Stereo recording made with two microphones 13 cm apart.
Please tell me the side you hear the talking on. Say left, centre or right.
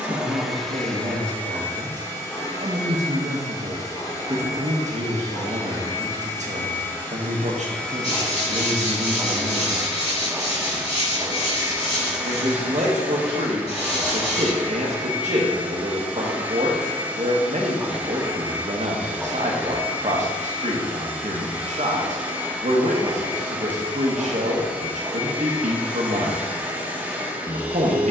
right.